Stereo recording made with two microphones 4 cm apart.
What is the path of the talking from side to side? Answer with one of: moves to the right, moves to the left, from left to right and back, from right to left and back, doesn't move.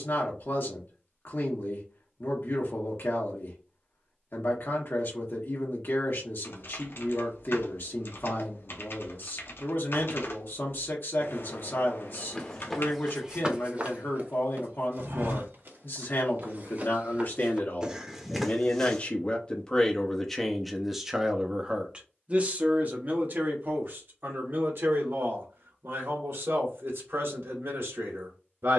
moves to the right.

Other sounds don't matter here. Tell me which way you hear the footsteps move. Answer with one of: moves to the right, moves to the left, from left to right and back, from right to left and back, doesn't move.
from left to right and back.